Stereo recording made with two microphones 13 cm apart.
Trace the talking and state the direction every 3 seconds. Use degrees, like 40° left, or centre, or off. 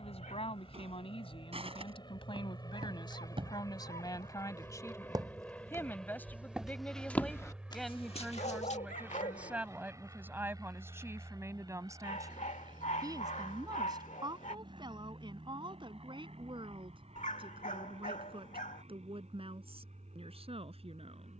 50° left, 30° left, centre, 20° right, 30° right, 40° right, 50° right.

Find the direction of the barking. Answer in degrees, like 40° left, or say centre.
80° left.